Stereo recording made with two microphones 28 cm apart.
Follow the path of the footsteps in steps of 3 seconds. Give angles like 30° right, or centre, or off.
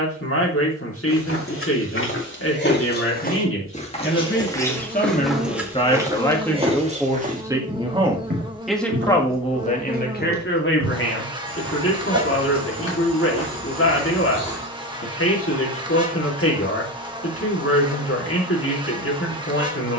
50° left, 10° left, 30° right, 50° right, 60° right, off, off.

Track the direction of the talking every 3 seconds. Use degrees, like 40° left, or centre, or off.
50° left, 40° left, centre, 40° left, 50° left, 50° left, 50° left.